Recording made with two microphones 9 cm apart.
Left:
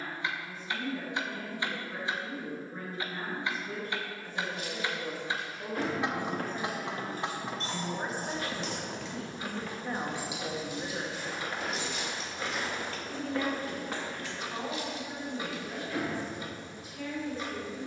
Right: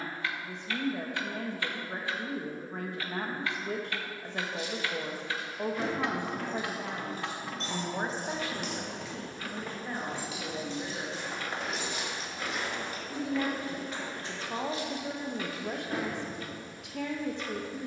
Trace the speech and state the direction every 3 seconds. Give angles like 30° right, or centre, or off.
70° right, 70° right, 50° right, 10° left, 30° right, 70° right.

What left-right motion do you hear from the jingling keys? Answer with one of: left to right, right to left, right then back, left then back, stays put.
left to right.